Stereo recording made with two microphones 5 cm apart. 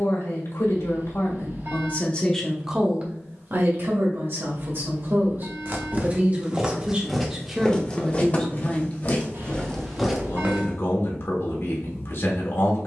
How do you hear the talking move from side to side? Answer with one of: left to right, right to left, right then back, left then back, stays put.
right then back.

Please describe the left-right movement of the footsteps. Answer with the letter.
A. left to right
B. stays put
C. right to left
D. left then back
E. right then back
D.